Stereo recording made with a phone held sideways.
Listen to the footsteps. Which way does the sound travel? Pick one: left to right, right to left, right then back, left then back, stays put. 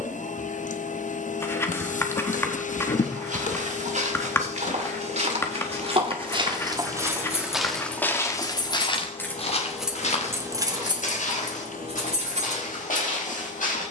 right to left.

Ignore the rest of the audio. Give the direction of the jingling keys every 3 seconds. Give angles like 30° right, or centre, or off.
off, off, 40° left, 20° right, 50° right.